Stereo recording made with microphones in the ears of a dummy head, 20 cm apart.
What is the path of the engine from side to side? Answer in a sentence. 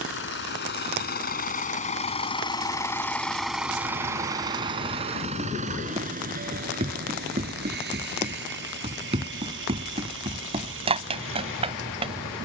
In this clip you hear the engine move to the right.